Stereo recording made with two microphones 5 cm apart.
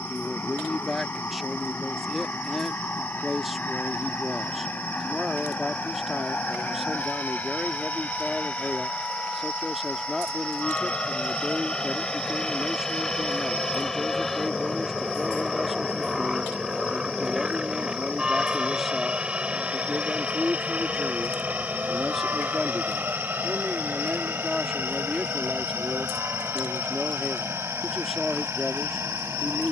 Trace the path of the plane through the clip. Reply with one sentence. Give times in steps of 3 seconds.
In this clip you hear the plane on the left from 0 s, in the centre from 12 s and on the right from 18 s.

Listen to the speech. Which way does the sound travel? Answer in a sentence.
You can hear the speech stay put.